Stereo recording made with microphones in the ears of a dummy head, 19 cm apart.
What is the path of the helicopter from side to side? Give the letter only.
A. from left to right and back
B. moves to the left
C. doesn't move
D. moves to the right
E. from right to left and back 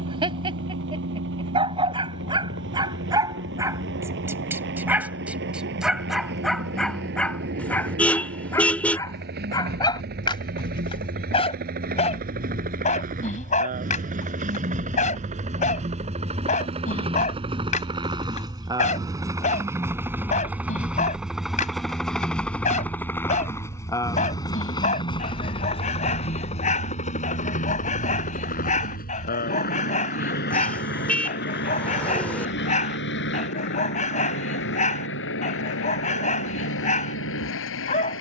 B.